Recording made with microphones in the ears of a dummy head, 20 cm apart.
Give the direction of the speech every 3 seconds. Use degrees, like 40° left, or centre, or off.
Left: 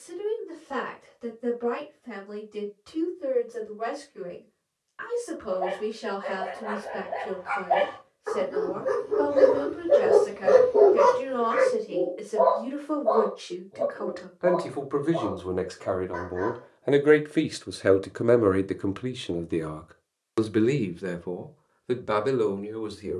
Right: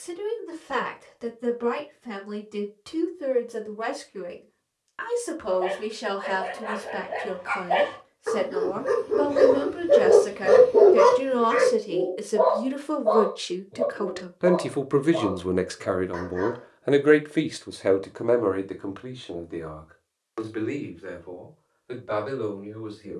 70° right, 70° right, 70° right, 60° right, 50° right, 10° right, 40° left, 70° left.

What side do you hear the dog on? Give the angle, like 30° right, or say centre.
40° right.